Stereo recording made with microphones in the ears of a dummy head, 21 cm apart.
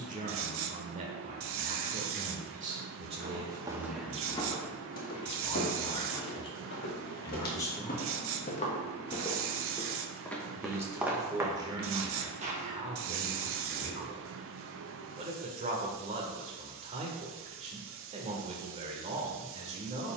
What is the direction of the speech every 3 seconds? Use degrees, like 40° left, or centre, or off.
30° right, centre, 20° left, 20° right, 30° right, 30° right, 30° right.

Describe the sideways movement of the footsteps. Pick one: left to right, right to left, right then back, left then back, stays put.
left then back.